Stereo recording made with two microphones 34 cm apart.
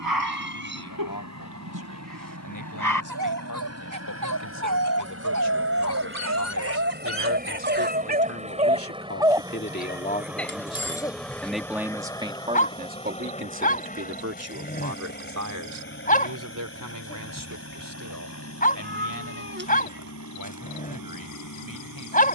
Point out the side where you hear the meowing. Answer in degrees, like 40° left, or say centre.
30° right.